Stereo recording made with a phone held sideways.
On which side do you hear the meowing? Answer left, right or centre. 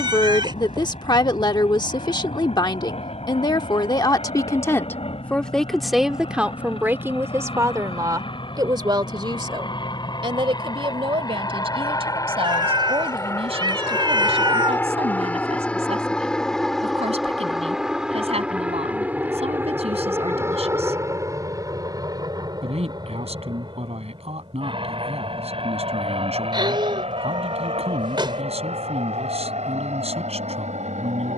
right.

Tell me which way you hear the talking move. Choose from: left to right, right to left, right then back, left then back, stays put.
left to right.